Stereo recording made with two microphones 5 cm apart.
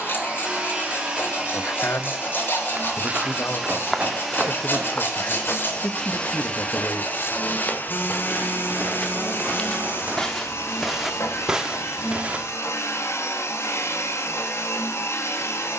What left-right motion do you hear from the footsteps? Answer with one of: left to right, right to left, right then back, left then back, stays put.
left then back.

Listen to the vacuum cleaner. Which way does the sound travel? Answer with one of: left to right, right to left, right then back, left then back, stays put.
right to left.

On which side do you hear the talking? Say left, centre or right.
left.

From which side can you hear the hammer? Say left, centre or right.
right.